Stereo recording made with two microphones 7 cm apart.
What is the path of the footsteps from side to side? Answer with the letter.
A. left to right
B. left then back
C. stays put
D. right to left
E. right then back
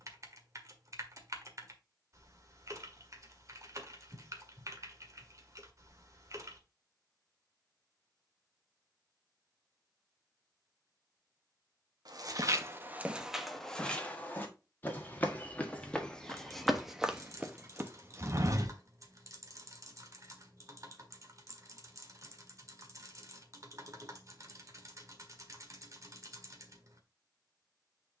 B.